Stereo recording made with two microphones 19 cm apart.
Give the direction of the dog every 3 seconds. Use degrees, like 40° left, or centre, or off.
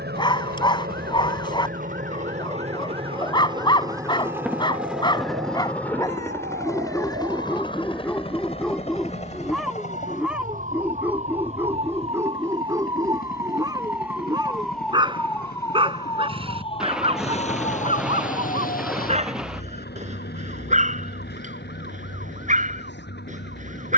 20° left, 20° left, 10° left, 10° right, 20° right, 30° right, 40° right, 40° right.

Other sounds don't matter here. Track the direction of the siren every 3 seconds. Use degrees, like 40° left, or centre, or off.
70° right, 70° right, 60° right, 40° right, 20° right, 20° left, 50° left, 70° left.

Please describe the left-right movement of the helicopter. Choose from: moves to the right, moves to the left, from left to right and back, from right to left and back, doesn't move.
moves to the left.